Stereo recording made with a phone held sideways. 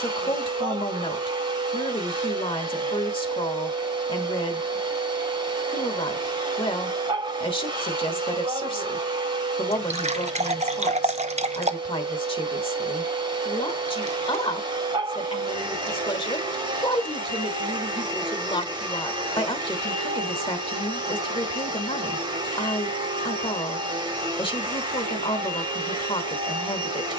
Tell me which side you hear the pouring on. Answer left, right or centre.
right.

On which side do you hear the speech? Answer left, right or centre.
left.